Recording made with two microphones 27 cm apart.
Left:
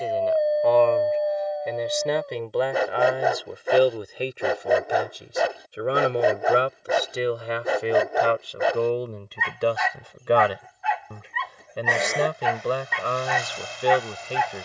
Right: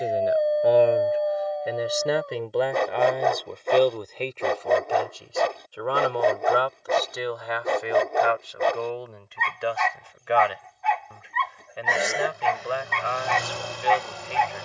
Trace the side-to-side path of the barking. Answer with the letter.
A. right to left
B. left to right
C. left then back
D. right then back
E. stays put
E.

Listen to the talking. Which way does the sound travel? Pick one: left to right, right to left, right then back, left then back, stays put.
right to left.